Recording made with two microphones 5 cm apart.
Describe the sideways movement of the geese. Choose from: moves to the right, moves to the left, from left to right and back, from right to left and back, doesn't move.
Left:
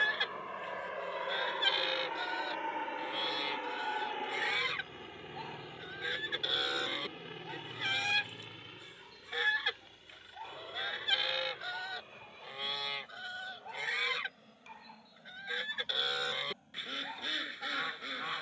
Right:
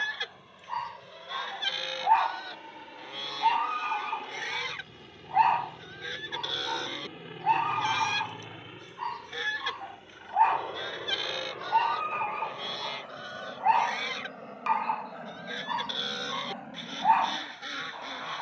doesn't move.